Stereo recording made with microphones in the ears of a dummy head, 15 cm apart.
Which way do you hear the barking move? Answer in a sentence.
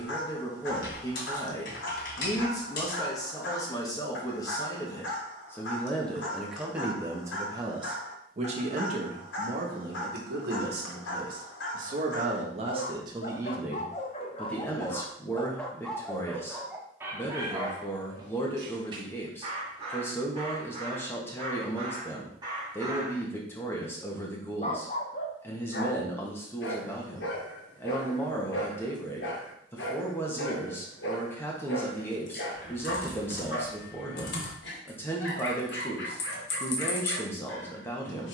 In this clip you hear the barking move from left to right and back again.